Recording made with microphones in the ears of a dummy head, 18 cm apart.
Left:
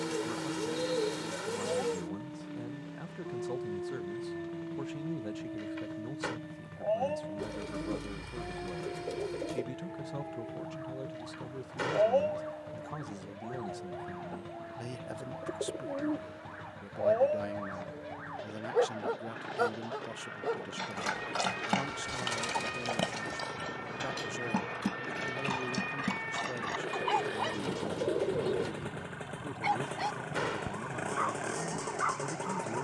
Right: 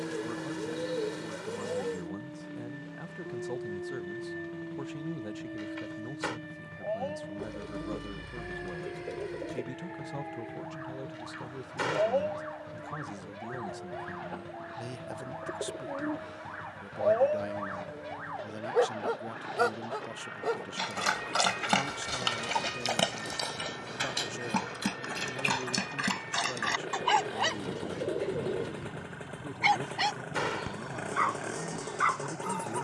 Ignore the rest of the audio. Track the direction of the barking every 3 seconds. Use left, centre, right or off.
left, left, left, left, centre, centre, right, right, right, right, right.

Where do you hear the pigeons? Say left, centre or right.
left.